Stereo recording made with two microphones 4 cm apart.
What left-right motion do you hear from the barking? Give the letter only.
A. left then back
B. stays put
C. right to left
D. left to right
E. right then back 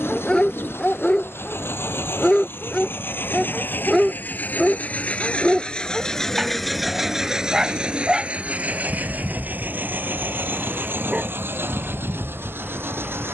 D.